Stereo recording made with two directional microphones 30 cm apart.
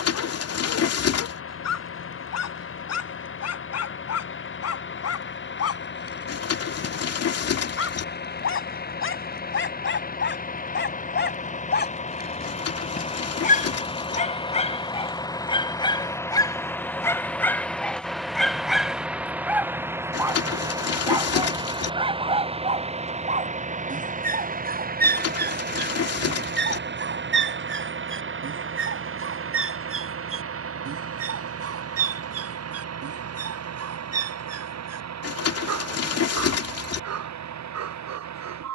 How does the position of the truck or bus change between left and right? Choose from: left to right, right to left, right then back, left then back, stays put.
left to right.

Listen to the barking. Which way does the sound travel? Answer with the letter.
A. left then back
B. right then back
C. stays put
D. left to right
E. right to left
D.